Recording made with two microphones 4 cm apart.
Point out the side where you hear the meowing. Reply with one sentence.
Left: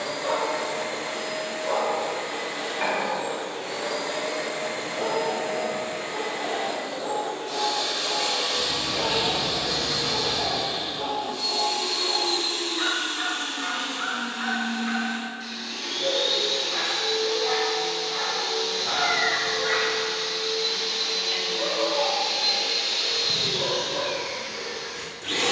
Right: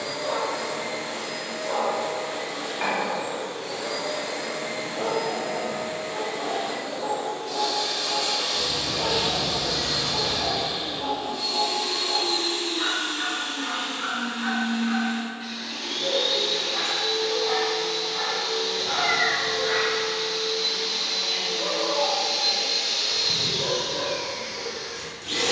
In this clip you hear the meowing on the right.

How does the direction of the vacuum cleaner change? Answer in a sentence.
In this clip you hear the vacuum cleaner move from left to right and back again.